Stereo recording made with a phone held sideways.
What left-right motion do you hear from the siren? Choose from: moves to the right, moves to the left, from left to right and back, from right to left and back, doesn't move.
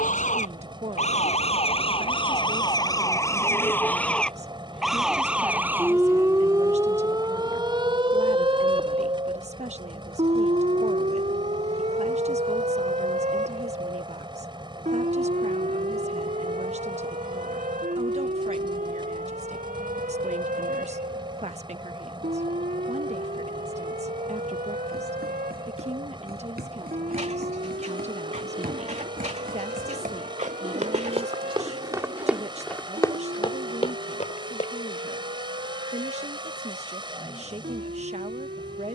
moves to the right.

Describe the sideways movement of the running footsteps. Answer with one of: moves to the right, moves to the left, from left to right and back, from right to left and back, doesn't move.
moves to the left.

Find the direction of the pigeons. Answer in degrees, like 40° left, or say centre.
50° right.